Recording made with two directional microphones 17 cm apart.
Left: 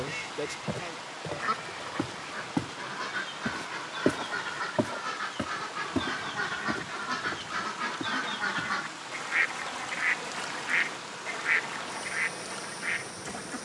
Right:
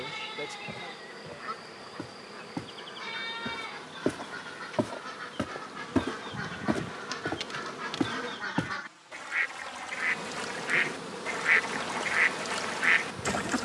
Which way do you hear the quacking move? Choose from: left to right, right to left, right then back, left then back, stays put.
left to right.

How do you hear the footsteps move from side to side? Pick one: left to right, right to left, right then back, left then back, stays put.
left to right.